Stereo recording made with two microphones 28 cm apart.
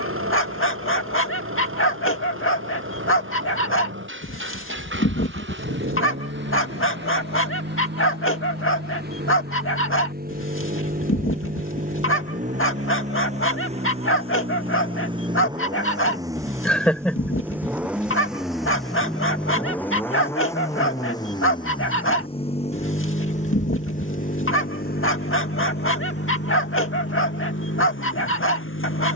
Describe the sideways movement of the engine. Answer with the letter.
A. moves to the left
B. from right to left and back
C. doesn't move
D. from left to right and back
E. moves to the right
A.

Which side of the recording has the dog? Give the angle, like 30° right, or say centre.
50° left.